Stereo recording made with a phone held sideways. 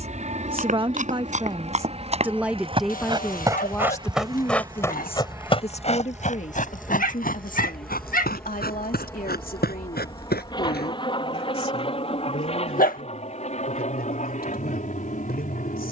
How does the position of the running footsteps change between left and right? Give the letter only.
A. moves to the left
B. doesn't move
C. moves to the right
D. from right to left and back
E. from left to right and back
A.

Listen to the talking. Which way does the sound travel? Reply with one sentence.
In this clip you hear the talking travel towards the left.